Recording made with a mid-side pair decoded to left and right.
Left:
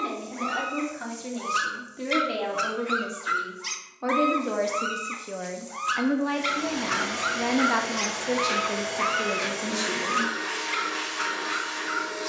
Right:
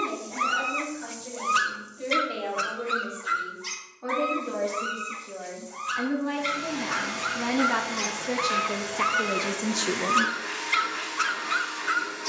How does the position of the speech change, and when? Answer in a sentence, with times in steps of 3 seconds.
You can hear the speech on the left from 0 s, in the centre from 6 s and on the right from 9 s.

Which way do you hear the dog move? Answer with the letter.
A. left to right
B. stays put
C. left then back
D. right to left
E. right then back
C.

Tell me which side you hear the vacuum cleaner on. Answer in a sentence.
You can hear the vacuum cleaner on the left.